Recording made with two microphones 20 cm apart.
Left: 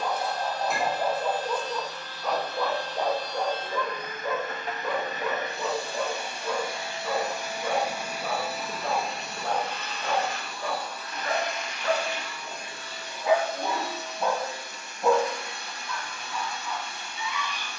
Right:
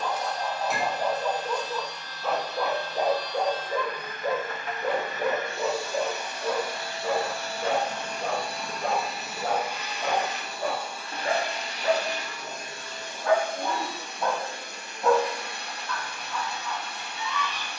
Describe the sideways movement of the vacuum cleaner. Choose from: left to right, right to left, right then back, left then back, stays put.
left to right.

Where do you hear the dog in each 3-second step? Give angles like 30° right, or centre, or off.
10° left, 30° right, 50° right, 50° right, centre, 10° left.